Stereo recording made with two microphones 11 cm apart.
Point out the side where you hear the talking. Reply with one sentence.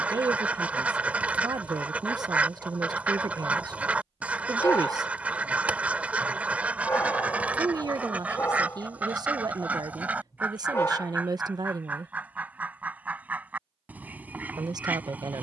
You can hear the talking on the right.